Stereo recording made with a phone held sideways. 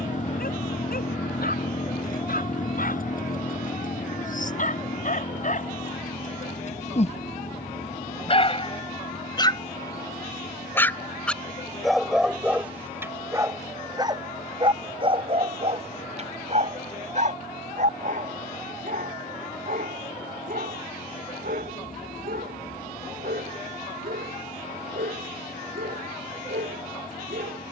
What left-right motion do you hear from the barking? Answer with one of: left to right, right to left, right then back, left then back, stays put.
left to right.